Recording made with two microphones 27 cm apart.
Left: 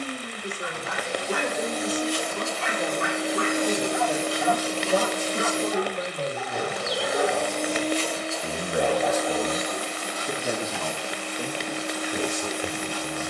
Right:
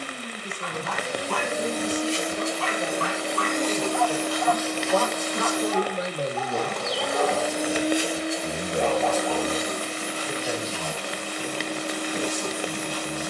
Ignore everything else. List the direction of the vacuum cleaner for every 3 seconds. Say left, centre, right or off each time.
right, left, centre, right, right.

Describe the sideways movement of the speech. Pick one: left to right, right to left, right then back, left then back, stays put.
right then back.